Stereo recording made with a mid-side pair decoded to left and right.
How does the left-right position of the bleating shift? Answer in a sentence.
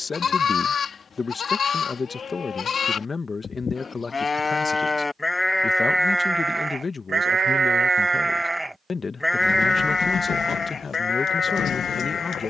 You can hear the bleating move from left to right and back again.